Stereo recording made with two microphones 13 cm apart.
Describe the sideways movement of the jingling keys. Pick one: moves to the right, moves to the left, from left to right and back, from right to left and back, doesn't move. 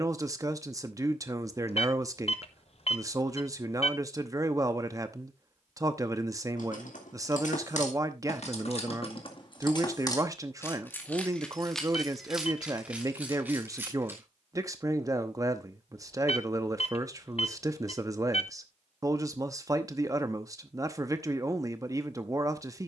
moves to the right.